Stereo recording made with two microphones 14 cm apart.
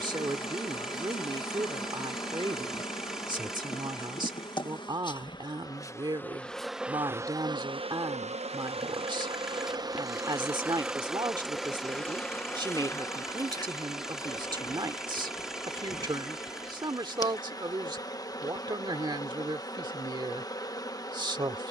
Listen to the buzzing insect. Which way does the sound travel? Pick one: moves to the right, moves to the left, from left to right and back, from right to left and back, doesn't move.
from left to right and back.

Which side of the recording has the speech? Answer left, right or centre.
right.